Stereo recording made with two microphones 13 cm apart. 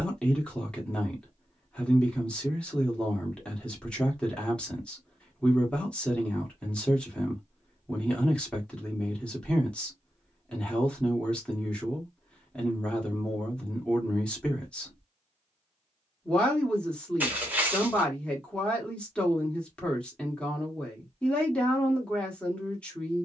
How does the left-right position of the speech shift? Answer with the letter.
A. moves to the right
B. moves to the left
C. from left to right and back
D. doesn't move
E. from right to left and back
D.